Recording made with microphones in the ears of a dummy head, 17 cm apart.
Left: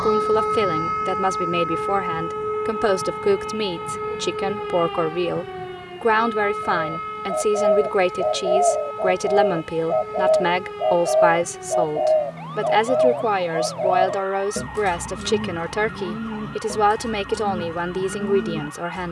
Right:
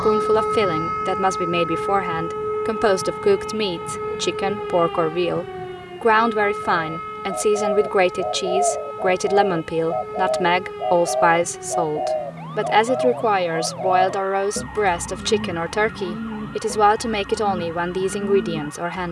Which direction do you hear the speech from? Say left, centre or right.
centre.